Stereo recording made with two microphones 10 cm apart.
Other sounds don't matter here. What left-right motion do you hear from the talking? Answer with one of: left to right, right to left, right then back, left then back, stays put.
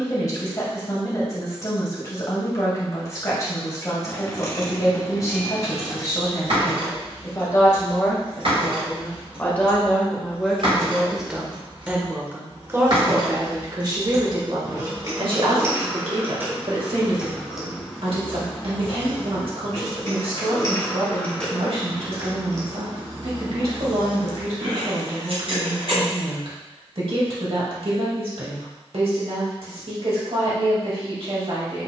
left to right.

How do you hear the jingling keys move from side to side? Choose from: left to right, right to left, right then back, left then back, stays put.
left then back.